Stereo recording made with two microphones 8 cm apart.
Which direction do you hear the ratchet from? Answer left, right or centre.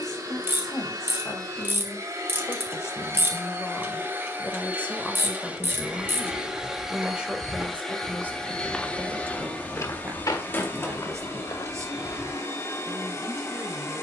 right.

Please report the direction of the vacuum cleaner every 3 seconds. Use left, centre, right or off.
right, right, centre, left, left.